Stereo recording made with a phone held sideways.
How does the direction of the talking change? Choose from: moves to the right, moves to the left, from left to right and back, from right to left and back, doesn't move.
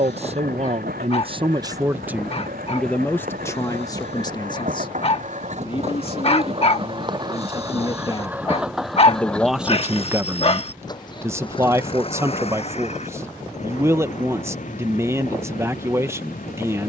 from right to left and back.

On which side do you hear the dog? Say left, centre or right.
left.